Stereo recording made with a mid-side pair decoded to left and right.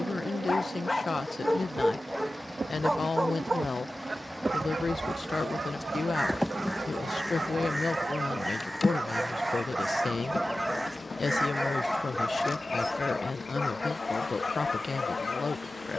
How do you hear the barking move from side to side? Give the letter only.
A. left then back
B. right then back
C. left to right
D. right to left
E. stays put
B.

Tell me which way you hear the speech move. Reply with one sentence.
You can hear the speech stay put.